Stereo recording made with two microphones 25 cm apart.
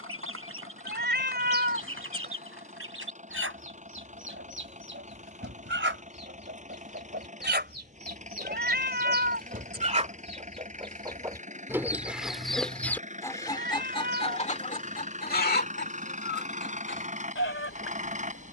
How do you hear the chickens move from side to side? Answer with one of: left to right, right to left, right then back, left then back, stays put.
right to left.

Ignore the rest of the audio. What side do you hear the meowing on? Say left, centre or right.
right.